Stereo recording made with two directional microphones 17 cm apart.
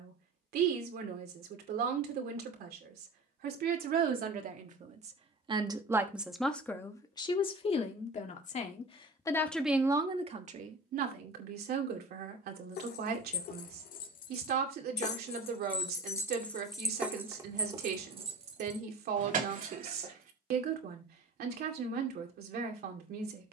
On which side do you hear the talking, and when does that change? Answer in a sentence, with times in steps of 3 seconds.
You can hear the talking on the right from 0 s, on the left from 6 s and on the right from 9 s.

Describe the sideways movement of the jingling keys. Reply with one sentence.
In this clip you hear the jingling keys move from left to right.